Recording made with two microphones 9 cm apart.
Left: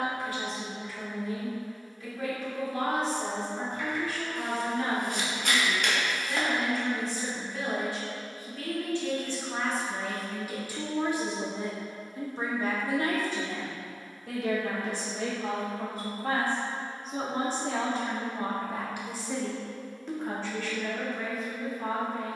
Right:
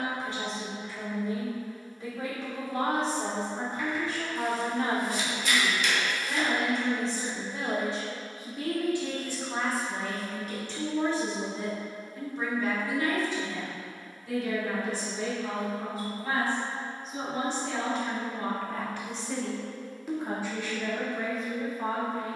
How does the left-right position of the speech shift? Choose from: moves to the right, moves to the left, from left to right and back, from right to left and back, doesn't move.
from right to left and back.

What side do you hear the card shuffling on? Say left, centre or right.
left.